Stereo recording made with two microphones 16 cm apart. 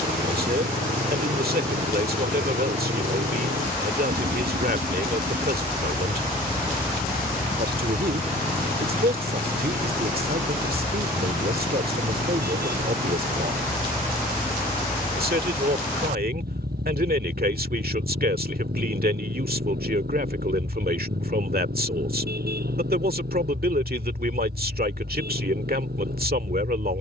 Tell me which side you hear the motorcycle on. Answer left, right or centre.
right.